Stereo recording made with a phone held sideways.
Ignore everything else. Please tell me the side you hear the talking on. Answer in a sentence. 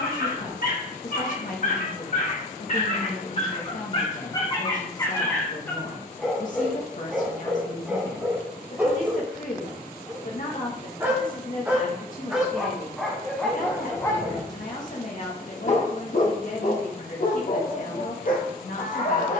You can hear the talking on the left.